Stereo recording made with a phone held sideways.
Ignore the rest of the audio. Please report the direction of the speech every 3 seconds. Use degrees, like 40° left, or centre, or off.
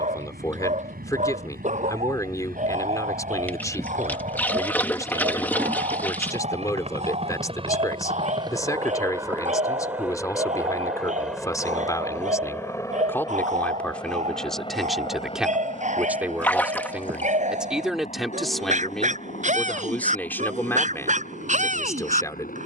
20° left, 20° left, 20° left, 20° left, 10° left, 10° right, 10° left, 20° left.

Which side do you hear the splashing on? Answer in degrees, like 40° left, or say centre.
10° left.